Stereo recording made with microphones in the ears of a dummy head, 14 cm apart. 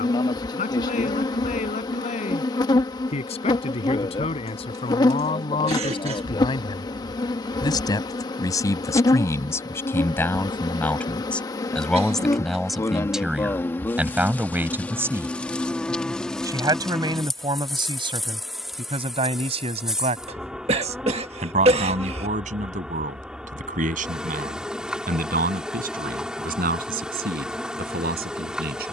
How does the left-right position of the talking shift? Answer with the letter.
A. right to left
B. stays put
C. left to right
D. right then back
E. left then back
C.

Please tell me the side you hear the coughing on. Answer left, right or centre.
right.